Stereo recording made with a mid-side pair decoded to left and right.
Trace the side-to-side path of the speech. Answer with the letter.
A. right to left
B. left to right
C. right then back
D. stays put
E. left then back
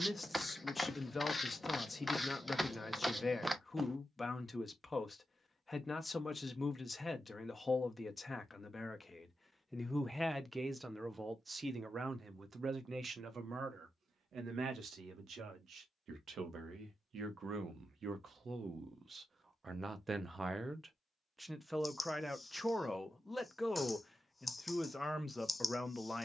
C.